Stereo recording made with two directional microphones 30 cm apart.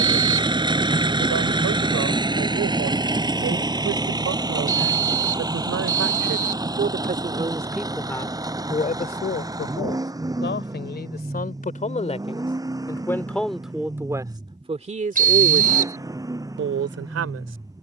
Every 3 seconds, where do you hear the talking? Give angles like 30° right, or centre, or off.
60° right, 60° right, 10° right, 30° left, centre, 40° right.